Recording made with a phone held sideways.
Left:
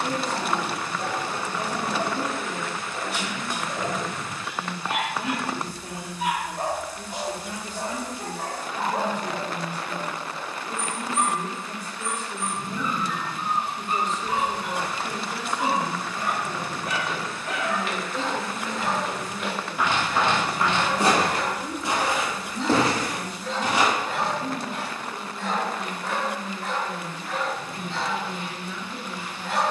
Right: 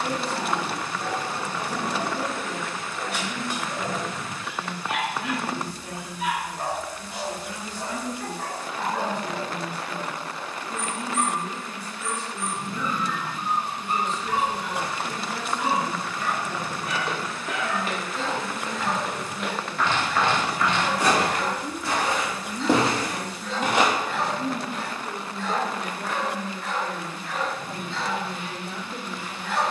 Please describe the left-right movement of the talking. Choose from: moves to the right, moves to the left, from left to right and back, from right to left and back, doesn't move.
moves to the right.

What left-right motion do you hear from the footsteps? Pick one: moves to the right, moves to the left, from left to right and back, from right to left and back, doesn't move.
from right to left and back.